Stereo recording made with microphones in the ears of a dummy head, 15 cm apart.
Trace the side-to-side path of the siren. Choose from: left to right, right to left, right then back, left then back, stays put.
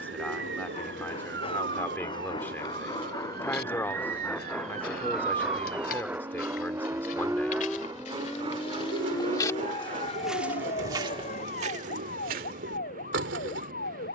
right to left.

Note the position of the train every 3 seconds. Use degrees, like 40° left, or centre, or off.
30° left, 10° left, 20° right, 40° right, 50° right.